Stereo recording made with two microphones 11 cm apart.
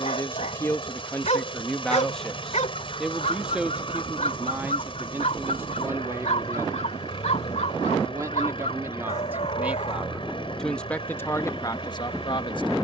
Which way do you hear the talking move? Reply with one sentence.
You can hear the talking go right and come back.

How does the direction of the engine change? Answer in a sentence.
In this clip you hear the engine stay in one place.